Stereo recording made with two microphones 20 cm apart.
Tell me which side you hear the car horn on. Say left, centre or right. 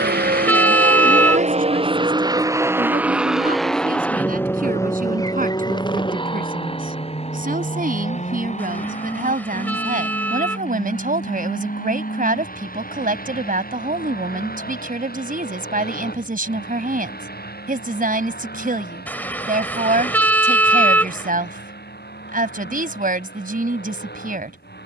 centre.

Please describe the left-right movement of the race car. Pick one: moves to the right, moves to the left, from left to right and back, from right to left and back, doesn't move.
moves to the left.